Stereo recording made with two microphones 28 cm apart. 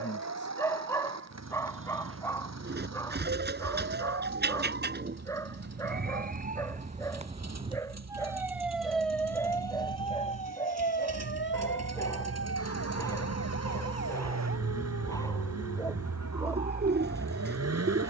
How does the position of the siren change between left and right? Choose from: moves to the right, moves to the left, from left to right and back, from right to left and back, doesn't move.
moves to the left.